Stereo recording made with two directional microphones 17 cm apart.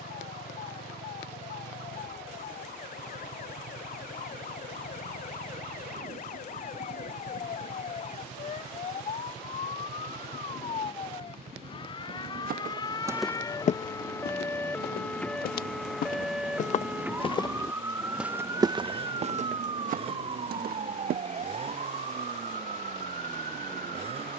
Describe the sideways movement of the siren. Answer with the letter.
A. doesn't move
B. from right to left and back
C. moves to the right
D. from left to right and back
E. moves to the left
C.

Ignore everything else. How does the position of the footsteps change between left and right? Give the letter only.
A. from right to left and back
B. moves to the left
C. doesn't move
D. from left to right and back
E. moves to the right
A.